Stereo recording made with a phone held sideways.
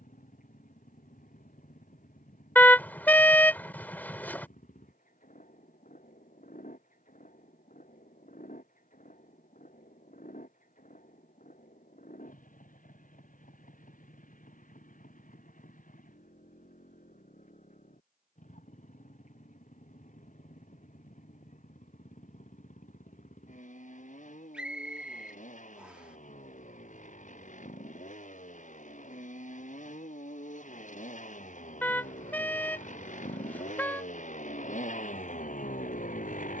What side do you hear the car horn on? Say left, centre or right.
centre.